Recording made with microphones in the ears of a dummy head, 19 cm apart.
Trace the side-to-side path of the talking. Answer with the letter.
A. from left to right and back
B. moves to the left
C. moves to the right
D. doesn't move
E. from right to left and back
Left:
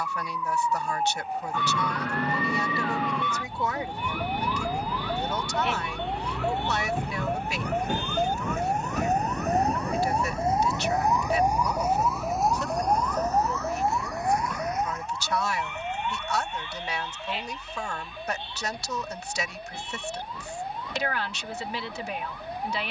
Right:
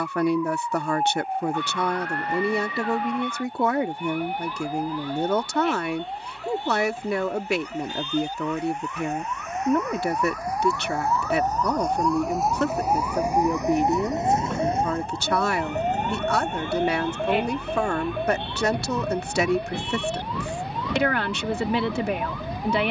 D.